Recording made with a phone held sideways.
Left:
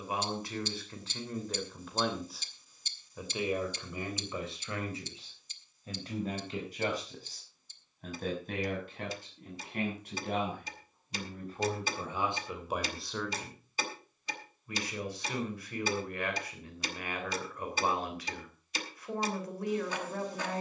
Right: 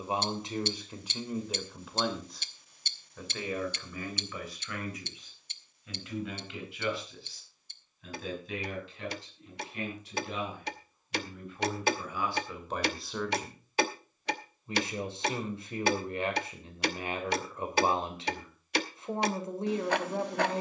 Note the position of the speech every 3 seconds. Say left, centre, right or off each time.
centre, left, left, left, centre, right, right.